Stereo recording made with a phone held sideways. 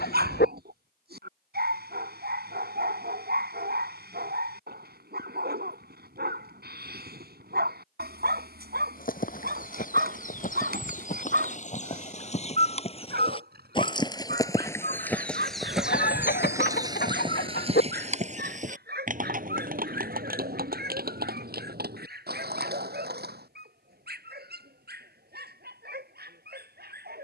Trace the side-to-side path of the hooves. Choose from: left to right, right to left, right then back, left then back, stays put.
left to right.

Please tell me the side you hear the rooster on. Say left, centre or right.
left.